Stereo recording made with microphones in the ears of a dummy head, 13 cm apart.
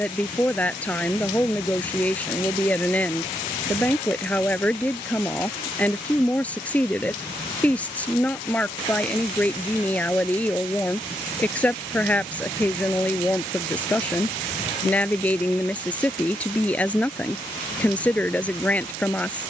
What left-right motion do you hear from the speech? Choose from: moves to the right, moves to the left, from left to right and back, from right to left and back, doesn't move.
doesn't move.